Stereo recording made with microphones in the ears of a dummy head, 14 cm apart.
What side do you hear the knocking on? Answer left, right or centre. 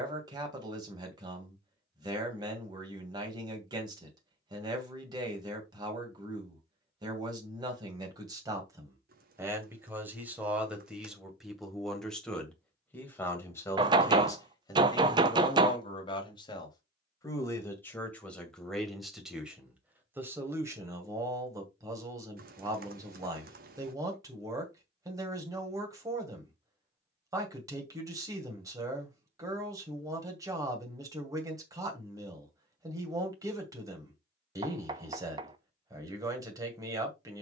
right.